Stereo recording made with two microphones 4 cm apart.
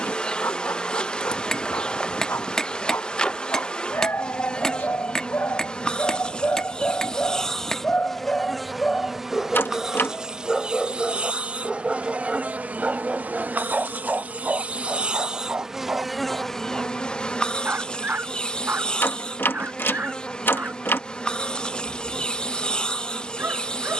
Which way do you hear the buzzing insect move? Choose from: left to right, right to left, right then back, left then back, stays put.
right then back.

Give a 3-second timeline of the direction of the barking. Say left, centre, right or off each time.
left, left, left, centre, right, right, right, right.